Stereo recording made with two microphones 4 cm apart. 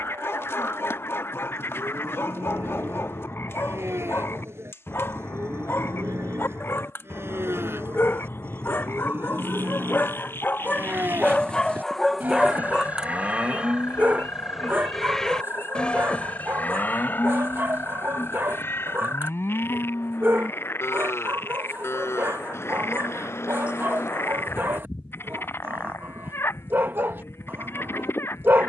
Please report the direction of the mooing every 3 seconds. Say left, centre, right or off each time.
right, right, right, right, right, left, left, left, left, left.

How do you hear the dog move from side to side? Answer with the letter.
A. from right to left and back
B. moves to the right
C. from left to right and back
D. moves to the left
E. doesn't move
B.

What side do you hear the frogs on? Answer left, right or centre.
left.